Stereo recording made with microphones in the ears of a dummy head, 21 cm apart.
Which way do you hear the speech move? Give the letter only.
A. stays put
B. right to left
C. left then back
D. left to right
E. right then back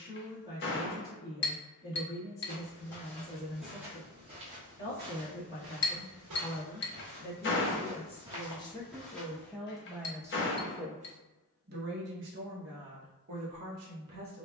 D.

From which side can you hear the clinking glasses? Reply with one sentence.
In this clip you hear the clinking glasses on the left.